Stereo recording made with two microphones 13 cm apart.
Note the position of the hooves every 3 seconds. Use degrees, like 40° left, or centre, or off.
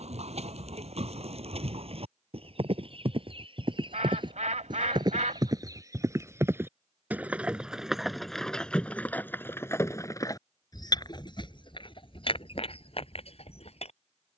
50° right, 40° right, 10° right, 30° left, 50° left.